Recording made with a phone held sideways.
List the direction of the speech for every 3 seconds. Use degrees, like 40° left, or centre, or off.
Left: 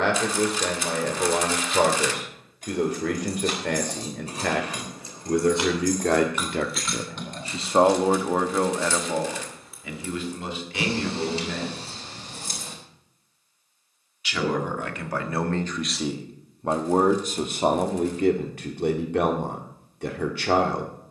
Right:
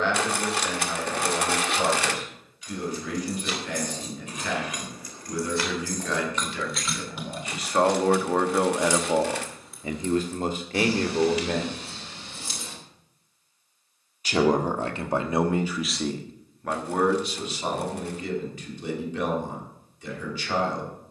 70° left, 70° left, 30° left, 40° right, 40° right, 20° left, 60° left.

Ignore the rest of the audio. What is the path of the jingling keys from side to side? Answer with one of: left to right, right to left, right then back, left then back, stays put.
right then back.